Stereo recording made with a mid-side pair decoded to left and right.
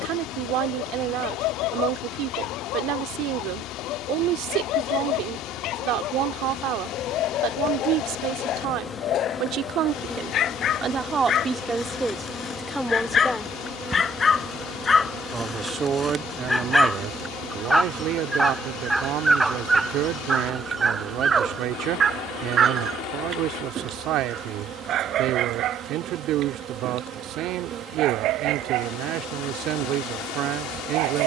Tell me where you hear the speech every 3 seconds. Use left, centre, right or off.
right, right, right, right, centre, right, right, right, right, right, right.